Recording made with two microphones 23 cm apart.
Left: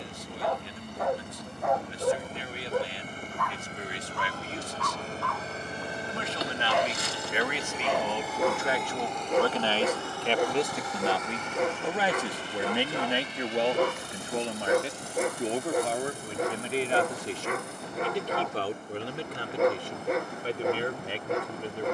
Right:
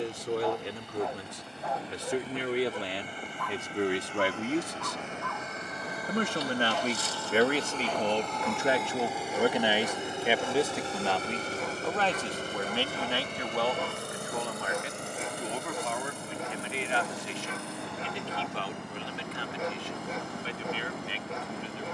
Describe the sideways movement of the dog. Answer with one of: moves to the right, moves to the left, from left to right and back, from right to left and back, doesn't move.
doesn't move.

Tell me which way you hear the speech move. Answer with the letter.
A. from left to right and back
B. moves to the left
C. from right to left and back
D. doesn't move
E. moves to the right
B.